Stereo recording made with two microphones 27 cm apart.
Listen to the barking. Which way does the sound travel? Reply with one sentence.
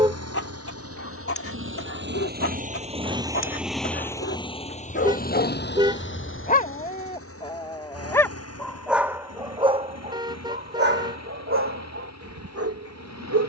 You can hear the barking move to the right.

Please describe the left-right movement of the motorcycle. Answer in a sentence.
You can hear the motorcycle travel towards the left.